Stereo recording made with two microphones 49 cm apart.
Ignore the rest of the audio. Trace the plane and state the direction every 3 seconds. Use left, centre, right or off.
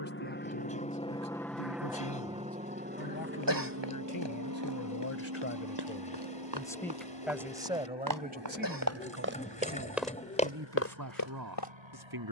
centre, right, right, right.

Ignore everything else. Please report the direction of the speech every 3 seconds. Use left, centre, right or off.
left, left, centre, right.